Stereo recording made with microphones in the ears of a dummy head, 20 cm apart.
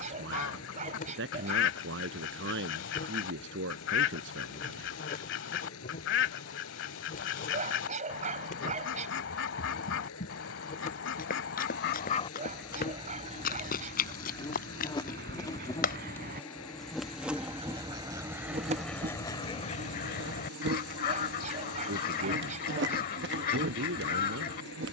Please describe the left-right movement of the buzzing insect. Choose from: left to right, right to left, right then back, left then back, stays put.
left to right.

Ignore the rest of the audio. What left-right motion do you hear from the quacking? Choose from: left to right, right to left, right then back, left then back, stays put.
right then back.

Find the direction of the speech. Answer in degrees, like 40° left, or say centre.
60° right.